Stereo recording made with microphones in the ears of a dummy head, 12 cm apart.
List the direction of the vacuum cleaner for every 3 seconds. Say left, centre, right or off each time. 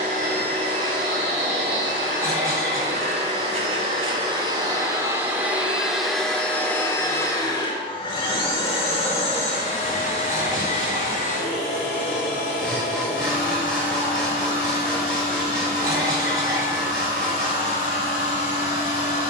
right, right, left, left, left, left, left.